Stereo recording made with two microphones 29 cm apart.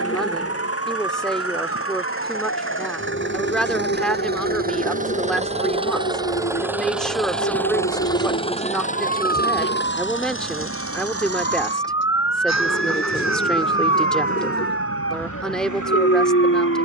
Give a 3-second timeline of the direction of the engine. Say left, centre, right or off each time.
right, right, centre, left, left, left.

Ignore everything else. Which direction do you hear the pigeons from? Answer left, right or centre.
left.